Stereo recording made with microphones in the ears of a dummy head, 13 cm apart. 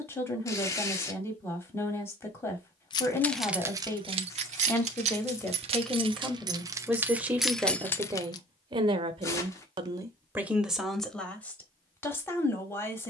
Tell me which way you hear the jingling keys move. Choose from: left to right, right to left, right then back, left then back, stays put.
right then back.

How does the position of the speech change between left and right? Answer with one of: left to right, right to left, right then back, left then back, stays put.
right then back.